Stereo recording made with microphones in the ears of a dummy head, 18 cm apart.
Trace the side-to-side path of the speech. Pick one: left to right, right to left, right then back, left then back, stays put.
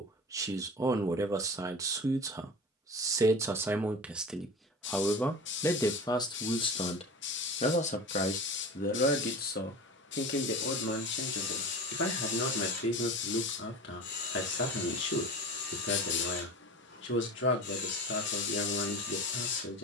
right to left.